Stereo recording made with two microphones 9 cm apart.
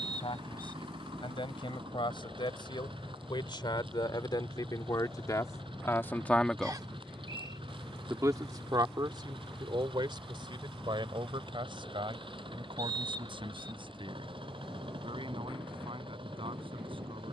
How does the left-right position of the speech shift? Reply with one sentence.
You can hear the speech move from left to right.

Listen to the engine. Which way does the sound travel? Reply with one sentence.
You can hear the engine stay put.